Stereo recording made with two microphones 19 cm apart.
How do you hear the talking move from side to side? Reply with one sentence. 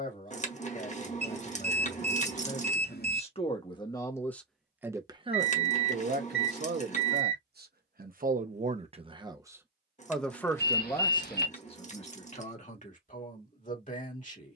In this clip you hear the talking move from left to right and back again.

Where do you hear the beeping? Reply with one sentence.
In this clip you hear the beeping on the left.